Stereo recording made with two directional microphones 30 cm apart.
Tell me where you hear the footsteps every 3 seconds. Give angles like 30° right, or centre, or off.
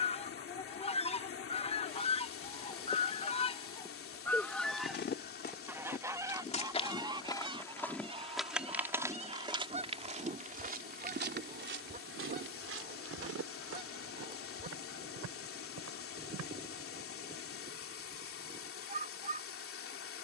off, 30° left, 10° left, 30° right, 50° right, 60° right, off.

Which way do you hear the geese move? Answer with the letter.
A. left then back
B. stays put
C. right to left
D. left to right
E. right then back
D.